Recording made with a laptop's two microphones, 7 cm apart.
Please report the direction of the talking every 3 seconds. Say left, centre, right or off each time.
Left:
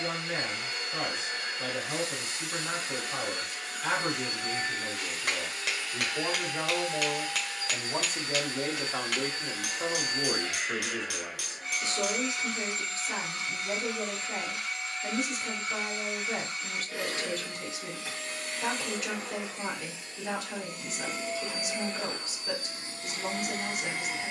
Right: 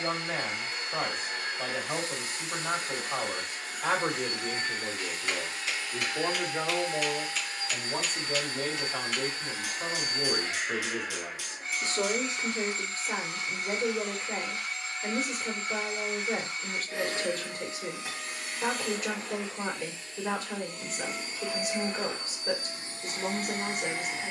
right, right, centre, centre, right, right, right, right.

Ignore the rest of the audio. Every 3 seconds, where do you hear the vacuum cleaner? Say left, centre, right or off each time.
right, right, right, right, right, right, centre, right.